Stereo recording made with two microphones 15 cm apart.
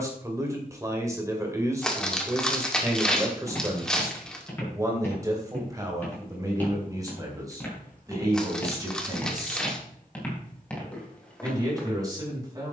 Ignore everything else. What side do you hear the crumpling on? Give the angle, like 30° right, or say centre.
centre.